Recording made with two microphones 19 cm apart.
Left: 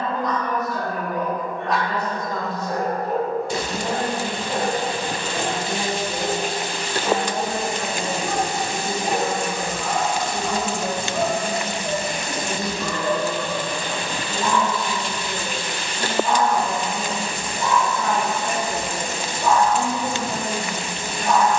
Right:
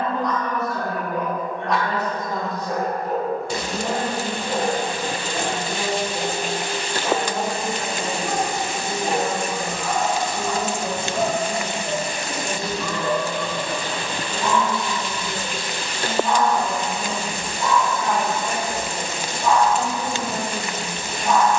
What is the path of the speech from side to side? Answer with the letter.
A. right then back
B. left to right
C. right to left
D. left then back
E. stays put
C.